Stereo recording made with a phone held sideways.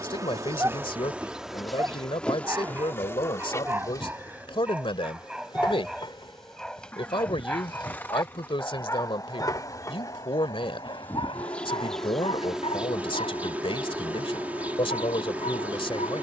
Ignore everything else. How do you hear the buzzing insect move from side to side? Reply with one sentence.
You can hear the buzzing insect go left and come back.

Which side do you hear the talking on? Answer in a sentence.
You can hear the talking on the left.